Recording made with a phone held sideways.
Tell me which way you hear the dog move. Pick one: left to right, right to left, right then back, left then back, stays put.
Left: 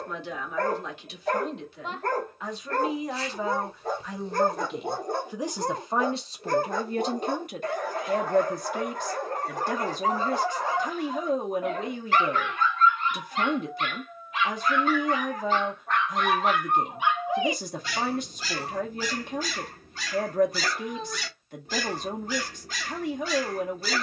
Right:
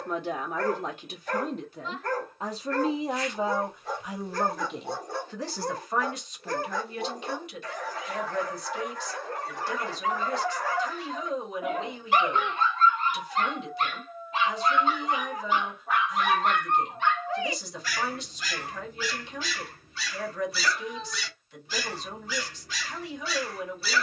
right then back.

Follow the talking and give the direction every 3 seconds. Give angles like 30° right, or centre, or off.
40° right, centre, 40° left, 50° left, 50° left, 50° left, 50° left, 50° left.